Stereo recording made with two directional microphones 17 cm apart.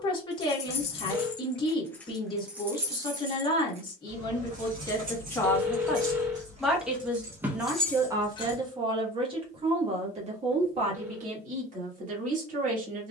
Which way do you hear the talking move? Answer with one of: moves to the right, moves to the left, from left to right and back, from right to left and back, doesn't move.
moves to the right.